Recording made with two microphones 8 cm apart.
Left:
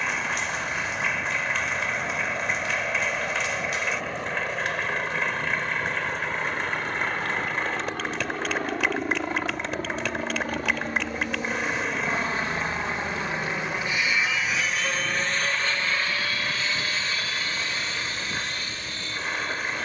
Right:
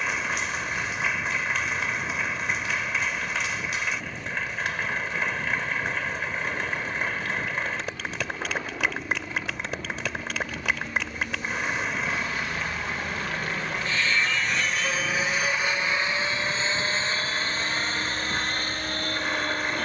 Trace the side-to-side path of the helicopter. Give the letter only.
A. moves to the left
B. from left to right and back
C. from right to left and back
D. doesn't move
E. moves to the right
E.